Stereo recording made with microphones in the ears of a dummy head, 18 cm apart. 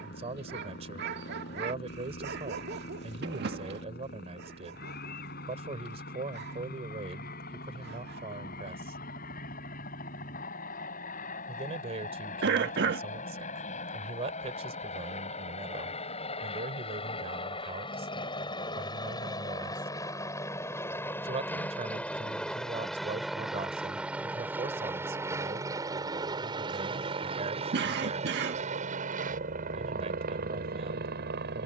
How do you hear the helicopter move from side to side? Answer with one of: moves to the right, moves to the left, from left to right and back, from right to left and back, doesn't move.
moves to the right.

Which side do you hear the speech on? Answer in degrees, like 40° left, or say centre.
30° right.